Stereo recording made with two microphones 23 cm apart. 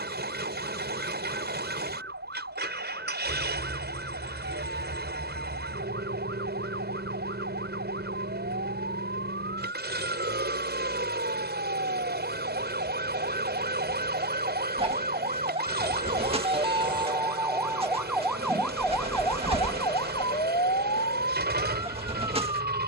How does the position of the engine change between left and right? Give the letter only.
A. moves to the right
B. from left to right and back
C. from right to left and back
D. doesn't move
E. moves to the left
D.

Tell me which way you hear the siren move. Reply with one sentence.
In this clip you hear the siren travel towards the left.